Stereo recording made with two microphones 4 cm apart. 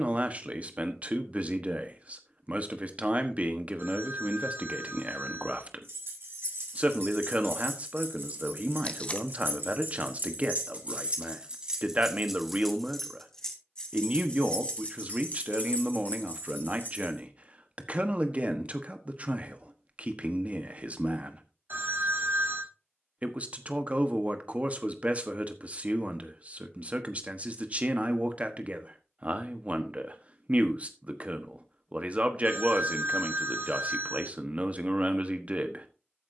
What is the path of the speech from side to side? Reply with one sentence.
You can hear the speech stay in one place.